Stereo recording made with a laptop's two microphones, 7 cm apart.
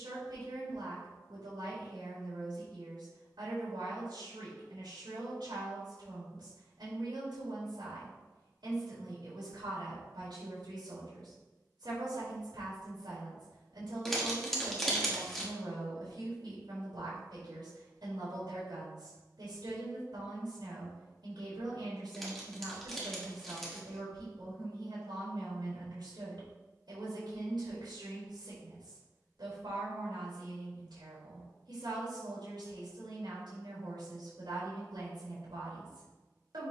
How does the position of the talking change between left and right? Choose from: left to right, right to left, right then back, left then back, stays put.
stays put.